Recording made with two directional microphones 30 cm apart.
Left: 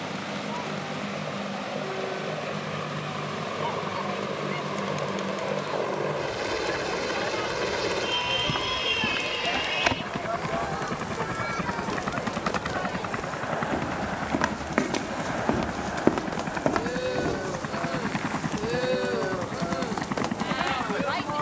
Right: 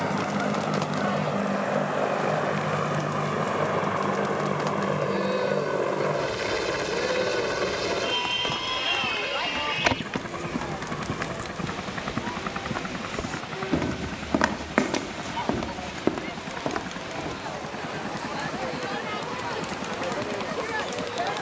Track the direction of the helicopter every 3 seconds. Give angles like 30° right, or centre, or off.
50° right, 30° right, 10° right, 10° left, 30° left, 40° left, 50° left.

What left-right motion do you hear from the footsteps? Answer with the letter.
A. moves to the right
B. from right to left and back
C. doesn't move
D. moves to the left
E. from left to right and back
E.